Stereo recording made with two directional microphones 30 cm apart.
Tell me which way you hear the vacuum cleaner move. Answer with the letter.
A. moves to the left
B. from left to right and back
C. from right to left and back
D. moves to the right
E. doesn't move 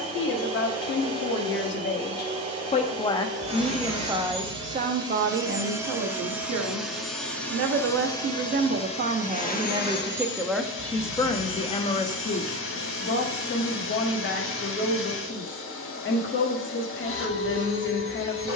A.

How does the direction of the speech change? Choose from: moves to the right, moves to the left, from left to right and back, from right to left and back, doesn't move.
from left to right and back.